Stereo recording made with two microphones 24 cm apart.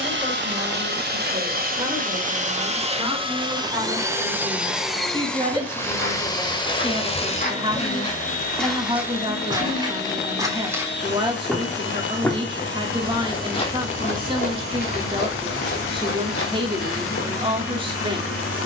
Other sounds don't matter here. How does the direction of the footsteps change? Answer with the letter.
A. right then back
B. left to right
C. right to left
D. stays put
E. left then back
A.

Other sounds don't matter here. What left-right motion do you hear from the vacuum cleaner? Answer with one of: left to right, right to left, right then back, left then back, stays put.
right to left.